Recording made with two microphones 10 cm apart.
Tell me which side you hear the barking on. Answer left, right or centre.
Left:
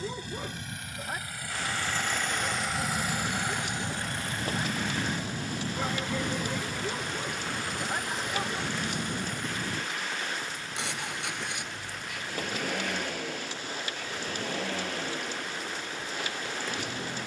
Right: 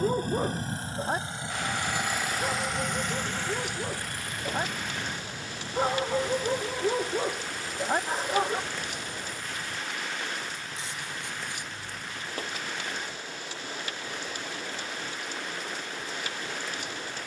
right.